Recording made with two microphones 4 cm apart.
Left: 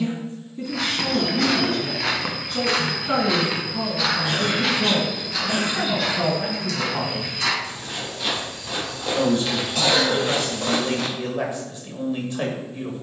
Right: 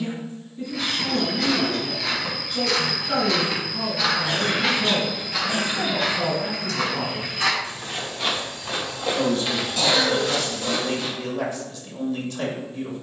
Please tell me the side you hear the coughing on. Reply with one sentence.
You can hear the coughing on the left.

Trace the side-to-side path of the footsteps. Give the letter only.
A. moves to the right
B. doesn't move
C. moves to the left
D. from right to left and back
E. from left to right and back
E.